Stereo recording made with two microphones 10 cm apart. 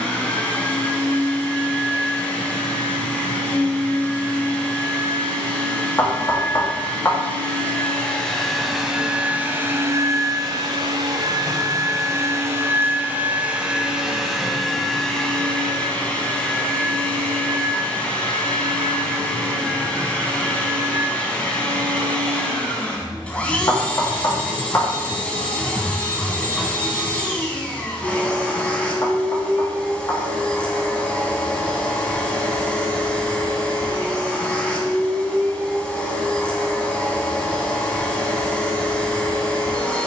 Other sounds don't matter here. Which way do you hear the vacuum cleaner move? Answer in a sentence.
In this clip you hear the vacuum cleaner move from left to right and back again.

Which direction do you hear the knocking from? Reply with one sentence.
You can hear the knocking on the left.